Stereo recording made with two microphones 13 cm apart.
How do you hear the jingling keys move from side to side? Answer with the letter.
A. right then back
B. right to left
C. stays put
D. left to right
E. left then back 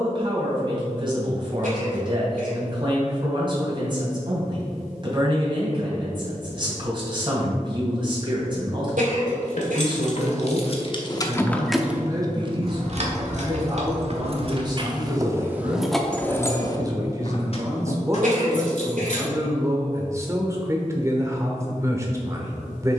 A.